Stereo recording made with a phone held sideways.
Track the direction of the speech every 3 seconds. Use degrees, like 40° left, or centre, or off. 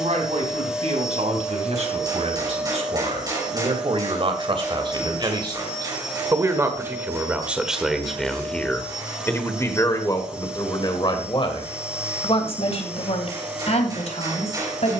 60° right, 40° right, 10° right, 30° left, 60° left.